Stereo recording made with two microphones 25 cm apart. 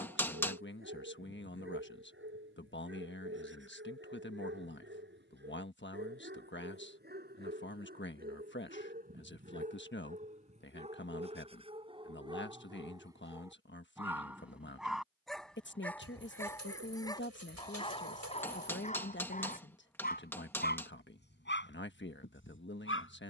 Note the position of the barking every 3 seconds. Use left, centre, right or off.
right, right, right, right, centre, centre, left, left.